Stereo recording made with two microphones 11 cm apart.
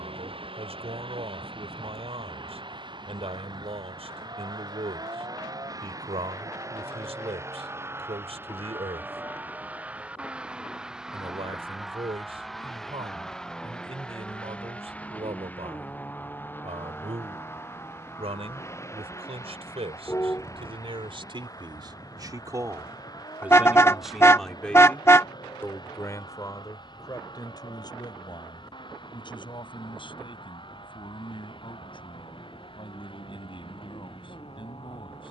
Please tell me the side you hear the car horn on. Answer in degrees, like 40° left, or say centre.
20° left.